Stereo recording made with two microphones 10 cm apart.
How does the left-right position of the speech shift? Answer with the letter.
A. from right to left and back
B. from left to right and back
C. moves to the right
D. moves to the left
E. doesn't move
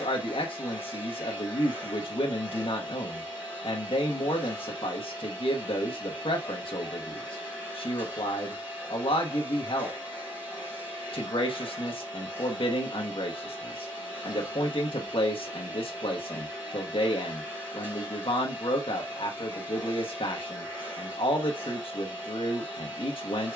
E.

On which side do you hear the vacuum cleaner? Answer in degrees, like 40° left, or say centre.
20° right.